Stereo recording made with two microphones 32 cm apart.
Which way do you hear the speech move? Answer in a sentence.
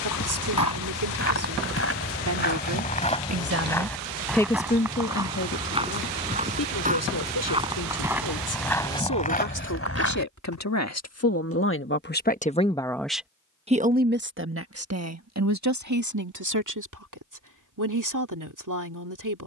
You can hear the speech move from right to left and back again.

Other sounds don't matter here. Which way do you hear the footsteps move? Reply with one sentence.
You can hear the footsteps go right and come back.